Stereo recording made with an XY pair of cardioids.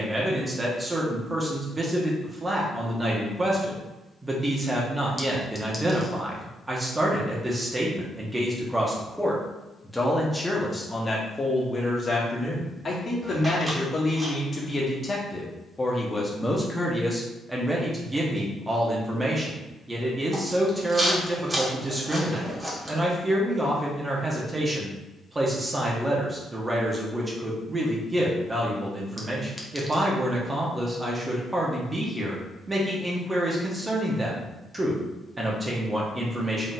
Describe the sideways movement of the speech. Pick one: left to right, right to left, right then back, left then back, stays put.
left then back.